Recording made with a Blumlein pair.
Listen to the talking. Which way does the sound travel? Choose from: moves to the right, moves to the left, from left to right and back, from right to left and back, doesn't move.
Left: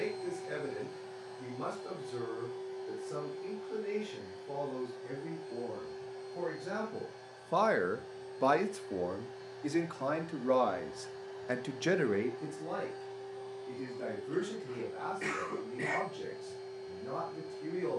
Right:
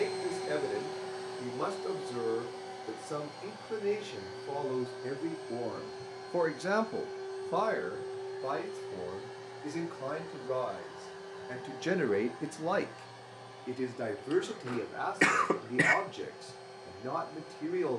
from right to left and back.